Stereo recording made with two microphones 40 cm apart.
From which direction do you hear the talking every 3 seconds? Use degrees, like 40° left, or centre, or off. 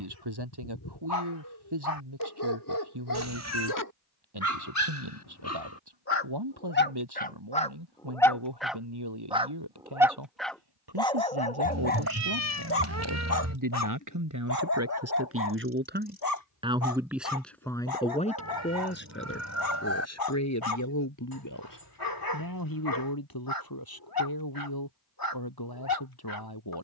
70° right, 70° right, 70° right, 70° right, 50° right, 10° right, 30° left, 50° left, 60° left.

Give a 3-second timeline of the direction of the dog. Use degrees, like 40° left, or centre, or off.
60° left, 40° left, 20° left, 10° left, 40° left, 50° left, 60° left, 60° left, 60° left.